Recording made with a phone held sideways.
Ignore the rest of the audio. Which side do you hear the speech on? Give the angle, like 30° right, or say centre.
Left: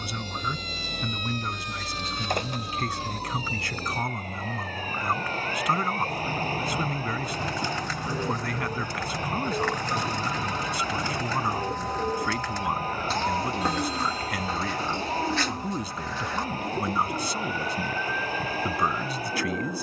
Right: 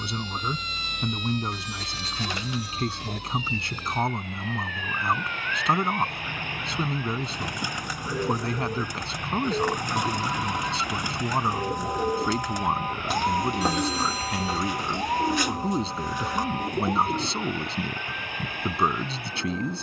30° right.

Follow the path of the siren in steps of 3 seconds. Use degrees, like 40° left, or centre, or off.
50° left, 40° left, 30° left, centre, 20° right, 40° right, 50° right.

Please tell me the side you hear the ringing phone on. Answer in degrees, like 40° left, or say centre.
70° right.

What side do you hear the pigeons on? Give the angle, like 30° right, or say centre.
10° right.